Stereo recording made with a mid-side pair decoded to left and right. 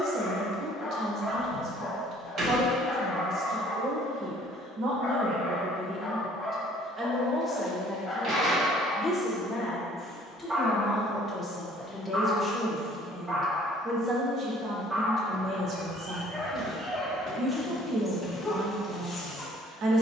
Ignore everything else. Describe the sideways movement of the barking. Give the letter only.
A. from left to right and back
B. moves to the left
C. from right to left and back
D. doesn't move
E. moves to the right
A.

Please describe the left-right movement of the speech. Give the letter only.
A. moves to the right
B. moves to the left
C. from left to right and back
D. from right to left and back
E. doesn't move
D.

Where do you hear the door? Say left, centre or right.
right.